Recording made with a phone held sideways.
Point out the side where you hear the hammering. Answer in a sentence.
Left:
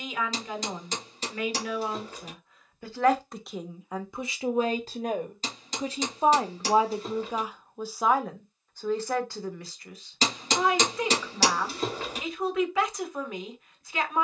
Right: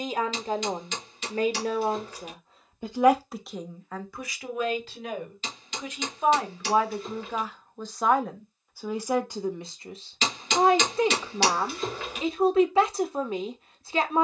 You can hear the hammering on the left.